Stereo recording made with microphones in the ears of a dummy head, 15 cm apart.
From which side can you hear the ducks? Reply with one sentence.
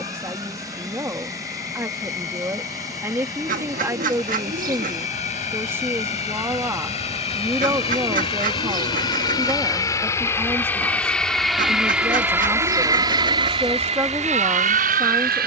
You can hear the ducks on the right.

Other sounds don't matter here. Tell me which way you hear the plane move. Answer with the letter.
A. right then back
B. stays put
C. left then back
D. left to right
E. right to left
D.